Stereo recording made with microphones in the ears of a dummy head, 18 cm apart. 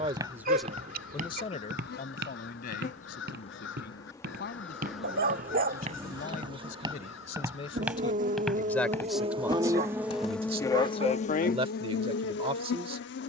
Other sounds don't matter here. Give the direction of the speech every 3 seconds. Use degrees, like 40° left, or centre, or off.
20° left, 50° left, 30° left, 20° right, 30° right.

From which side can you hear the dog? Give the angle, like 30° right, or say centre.
50° right.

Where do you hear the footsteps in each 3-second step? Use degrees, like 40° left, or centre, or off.
40° right, 50° right, 10° right, 20° left, off.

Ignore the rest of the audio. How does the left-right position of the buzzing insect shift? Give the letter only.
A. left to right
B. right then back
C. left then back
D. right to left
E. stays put
B.